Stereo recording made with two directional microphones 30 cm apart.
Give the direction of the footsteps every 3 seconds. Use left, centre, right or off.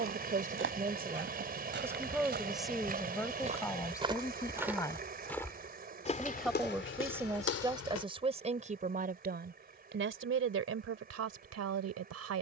right, centre, left, off.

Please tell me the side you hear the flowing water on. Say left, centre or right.
right.